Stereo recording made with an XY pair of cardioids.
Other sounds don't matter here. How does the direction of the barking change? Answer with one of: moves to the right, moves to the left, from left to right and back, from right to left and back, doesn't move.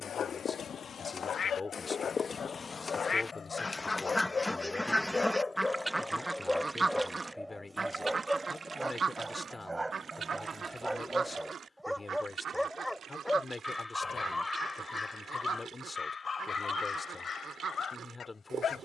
from left to right and back.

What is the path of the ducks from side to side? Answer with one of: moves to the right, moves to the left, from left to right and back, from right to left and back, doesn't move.
moves to the right.